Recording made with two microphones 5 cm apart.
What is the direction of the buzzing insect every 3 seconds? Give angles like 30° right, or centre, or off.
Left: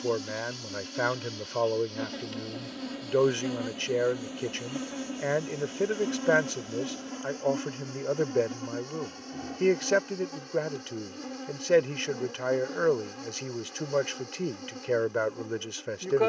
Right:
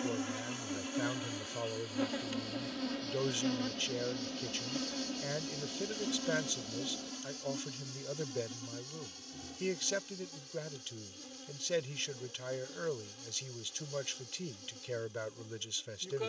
10° right, 20° left, 40° left, 60° left, 60° left, 60° left.